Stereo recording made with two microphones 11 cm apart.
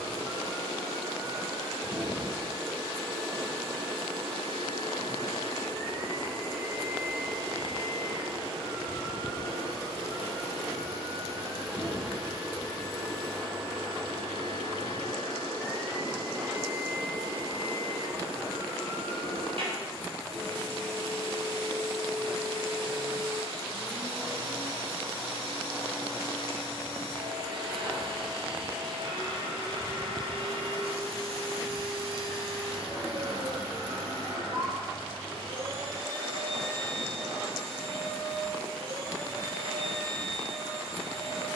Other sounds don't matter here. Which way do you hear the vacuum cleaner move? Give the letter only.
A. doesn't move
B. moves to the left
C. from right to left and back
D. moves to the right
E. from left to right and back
A.